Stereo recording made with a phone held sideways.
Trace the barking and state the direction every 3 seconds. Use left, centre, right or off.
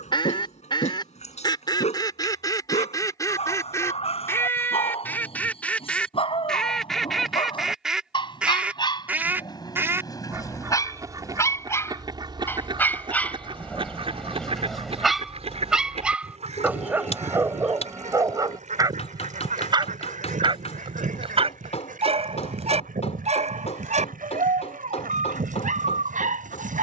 left, left, left, left, centre, centre, right, right, right.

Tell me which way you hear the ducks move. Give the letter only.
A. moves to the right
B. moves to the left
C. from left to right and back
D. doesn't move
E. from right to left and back
A.